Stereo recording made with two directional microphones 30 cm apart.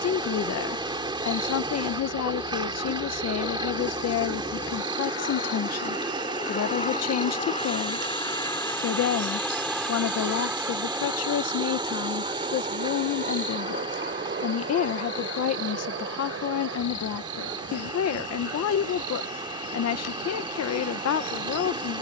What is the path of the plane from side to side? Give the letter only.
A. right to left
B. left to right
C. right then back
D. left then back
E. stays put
B.